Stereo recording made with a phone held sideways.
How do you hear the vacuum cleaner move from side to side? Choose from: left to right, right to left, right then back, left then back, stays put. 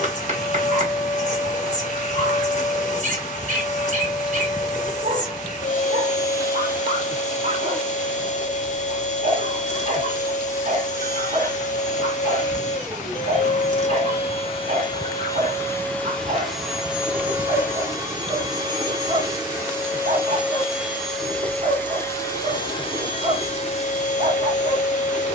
right then back.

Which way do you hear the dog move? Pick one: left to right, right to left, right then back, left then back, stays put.
stays put.